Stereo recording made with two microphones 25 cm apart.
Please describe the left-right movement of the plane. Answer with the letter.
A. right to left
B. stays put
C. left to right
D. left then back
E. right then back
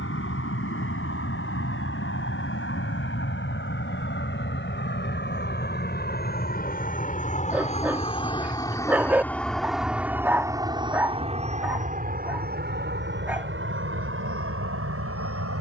C.